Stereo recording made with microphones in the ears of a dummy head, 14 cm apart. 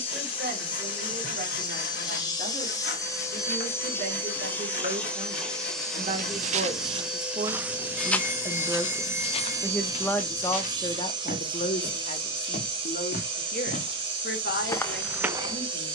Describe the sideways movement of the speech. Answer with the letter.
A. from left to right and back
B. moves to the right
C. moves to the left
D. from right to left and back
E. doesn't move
C.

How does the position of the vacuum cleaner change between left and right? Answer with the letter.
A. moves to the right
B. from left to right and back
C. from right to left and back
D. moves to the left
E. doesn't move
A.